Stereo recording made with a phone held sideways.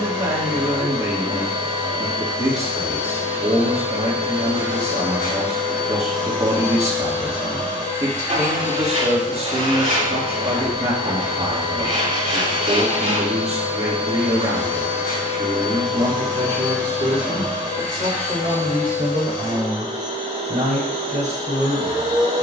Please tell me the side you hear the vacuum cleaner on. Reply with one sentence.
You can hear the vacuum cleaner on the right.